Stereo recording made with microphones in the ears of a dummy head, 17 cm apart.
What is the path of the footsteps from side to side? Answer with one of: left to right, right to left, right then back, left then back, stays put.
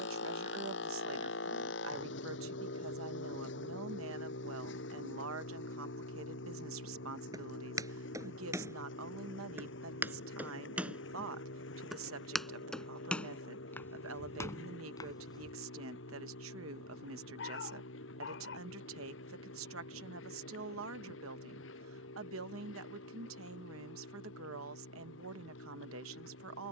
right to left.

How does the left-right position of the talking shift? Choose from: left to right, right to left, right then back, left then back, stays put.
stays put.